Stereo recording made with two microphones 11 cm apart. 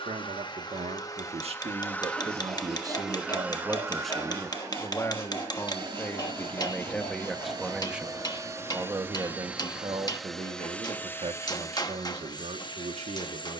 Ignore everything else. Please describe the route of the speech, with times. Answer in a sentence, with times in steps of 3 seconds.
You can hear the speech on the right from 0 s, in the centre from 3 s and on the right from 9 s.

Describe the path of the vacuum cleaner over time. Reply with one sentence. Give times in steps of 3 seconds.
You can hear the vacuum cleaner on the left from 0 s, on the right from 3 s, in the centre from 9 s and on the left from 12 s.